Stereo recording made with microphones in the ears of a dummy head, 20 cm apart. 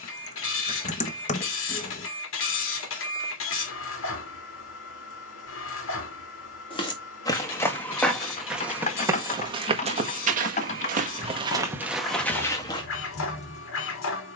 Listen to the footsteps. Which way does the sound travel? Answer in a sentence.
In this clip you hear the footsteps move from left to right and back again.